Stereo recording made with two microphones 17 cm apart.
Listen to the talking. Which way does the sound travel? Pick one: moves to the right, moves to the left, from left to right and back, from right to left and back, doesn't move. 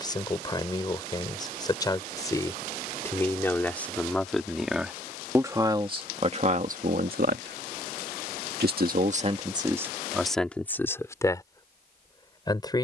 from left to right and back.